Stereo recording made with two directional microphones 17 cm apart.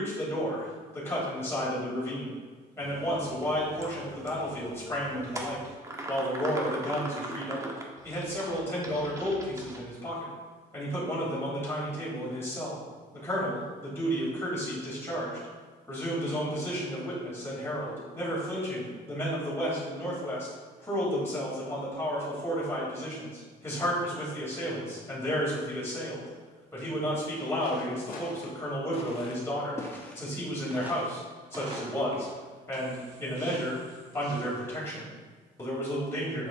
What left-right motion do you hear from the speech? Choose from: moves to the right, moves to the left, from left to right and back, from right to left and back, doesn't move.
doesn't move.